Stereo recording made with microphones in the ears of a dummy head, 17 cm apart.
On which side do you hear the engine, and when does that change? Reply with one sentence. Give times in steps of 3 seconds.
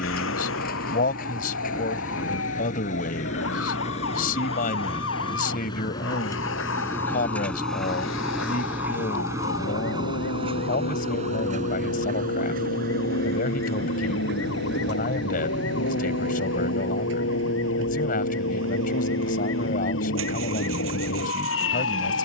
In this clip you hear the engine on the left from 0 s, in the centre from 6 s and on the right from 9 s.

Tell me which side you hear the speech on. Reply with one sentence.
You can hear the speech on the left.